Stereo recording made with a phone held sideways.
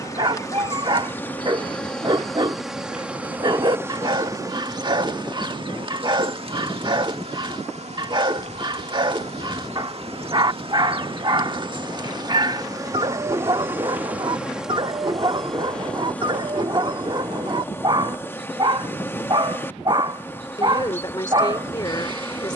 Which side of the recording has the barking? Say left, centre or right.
right.